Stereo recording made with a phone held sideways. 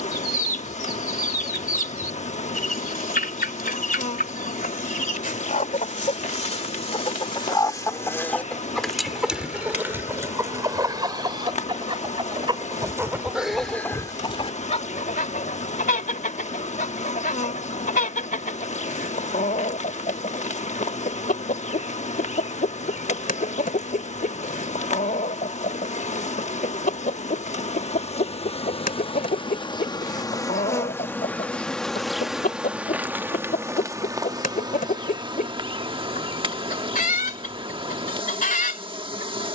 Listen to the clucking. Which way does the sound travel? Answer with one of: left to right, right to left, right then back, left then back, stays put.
right then back.